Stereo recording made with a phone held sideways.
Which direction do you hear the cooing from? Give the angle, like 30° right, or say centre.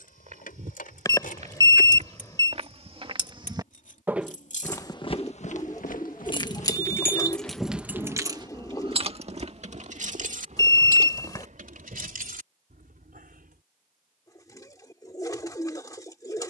20° left.